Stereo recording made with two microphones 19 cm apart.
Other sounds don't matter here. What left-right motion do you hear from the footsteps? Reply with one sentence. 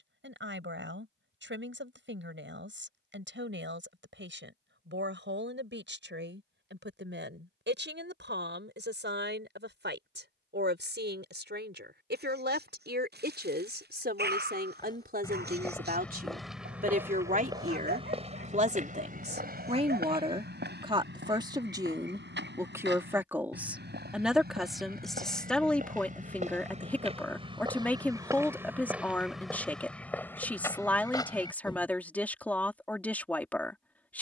In this clip you hear the footsteps move from left to right and back again.